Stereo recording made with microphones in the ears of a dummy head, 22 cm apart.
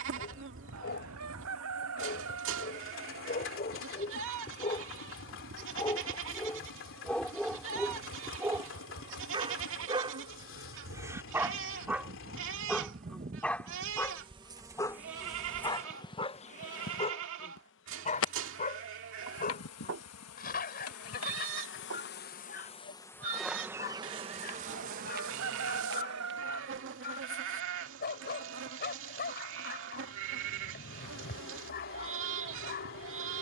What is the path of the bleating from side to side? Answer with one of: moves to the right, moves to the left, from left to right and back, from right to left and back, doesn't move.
doesn't move.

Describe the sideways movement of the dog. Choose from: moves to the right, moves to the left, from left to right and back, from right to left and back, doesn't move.
from left to right and back.